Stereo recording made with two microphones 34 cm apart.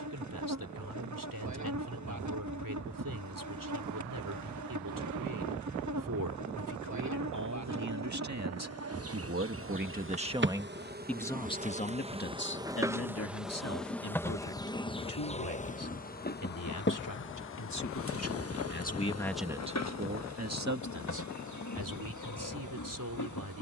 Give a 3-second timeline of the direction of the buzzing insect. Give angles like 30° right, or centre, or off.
60° right, 60° right, 50° right, 30° right, centre, 30° left, 50° left, 60° left.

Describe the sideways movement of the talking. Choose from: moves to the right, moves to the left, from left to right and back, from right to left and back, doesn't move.
from right to left and back.